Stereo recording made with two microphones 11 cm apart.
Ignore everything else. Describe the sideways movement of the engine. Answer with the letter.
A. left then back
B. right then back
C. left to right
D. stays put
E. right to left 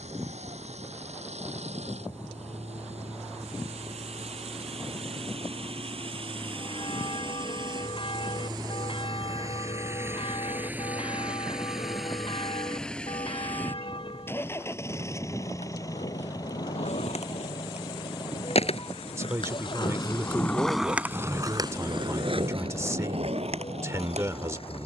E.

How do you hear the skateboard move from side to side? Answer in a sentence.
You can hear the skateboard go from the left side to the right.